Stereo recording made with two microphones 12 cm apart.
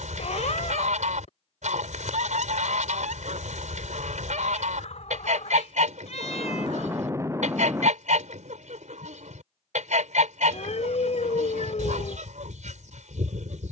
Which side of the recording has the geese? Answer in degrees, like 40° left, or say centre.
80° right.